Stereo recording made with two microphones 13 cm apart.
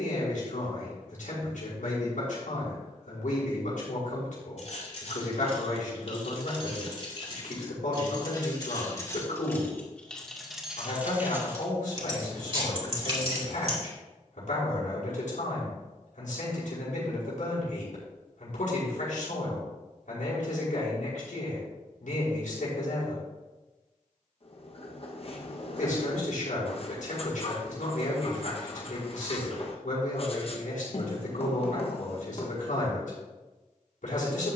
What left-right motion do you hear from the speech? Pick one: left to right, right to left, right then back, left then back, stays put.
stays put.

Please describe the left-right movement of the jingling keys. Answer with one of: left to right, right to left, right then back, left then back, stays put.
left to right.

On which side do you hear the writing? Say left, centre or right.
left.